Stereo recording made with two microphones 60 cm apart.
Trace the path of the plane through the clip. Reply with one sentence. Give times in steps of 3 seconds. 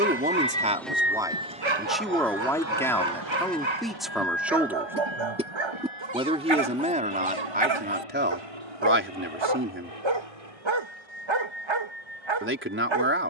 You can hear the plane in the centre from 0 s and on the right from 3 s.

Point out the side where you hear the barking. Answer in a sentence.
You can hear the barking on the right.